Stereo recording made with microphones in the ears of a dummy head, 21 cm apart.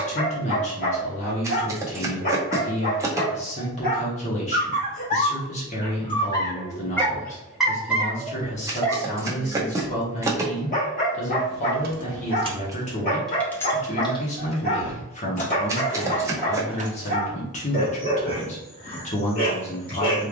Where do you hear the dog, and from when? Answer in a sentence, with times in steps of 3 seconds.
You can hear the dog on the left from 0 s, in the centre from 6 s and on the left from 9 s.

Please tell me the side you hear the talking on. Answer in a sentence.
You can hear the talking on the left.